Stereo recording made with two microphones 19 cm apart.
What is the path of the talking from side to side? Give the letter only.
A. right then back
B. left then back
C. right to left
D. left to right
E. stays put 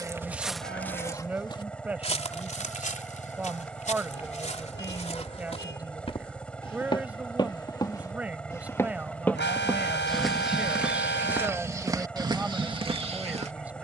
E.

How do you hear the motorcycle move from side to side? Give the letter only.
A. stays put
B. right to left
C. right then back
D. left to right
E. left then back
A.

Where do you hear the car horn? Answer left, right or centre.
left.